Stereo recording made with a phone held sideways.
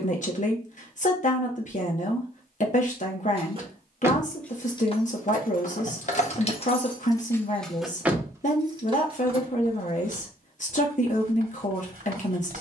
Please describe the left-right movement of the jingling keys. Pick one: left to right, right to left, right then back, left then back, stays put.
left then back.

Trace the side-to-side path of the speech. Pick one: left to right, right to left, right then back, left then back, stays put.
stays put.